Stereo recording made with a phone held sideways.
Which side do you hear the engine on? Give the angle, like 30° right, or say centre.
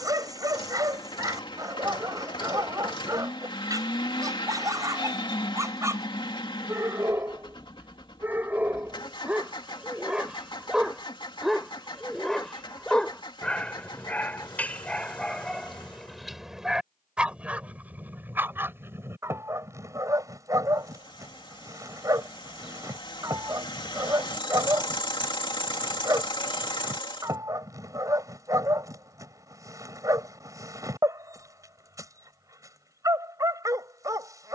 30° left.